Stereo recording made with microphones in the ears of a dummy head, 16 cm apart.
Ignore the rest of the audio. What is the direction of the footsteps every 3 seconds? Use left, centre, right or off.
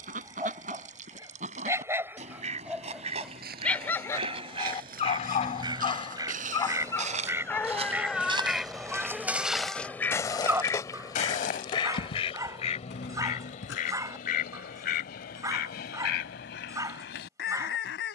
off, right, right, left, left, off.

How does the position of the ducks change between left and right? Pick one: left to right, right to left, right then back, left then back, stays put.
right to left.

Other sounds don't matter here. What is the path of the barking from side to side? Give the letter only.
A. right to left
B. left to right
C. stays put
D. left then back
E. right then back
D.